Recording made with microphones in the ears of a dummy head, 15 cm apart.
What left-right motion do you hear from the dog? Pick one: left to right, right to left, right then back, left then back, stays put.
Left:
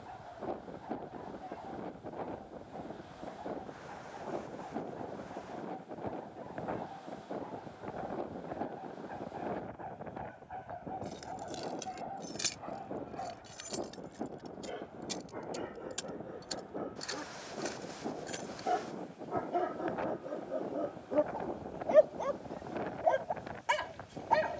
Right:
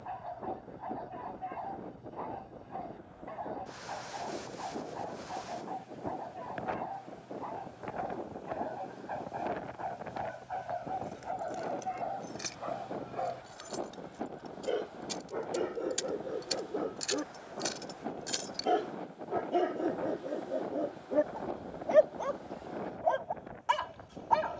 right to left.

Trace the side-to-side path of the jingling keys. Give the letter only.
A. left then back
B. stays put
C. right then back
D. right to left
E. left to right
E.